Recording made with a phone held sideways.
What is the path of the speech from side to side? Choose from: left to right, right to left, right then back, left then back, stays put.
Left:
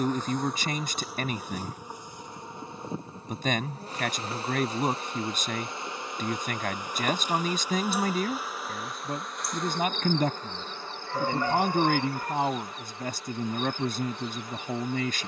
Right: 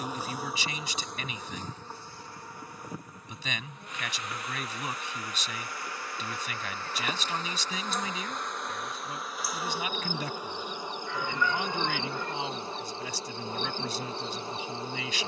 stays put.